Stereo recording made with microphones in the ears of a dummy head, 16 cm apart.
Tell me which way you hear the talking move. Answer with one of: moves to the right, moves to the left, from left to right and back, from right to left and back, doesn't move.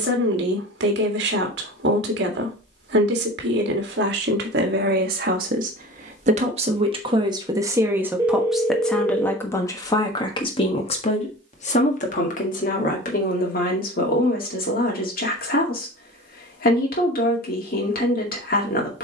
moves to the left.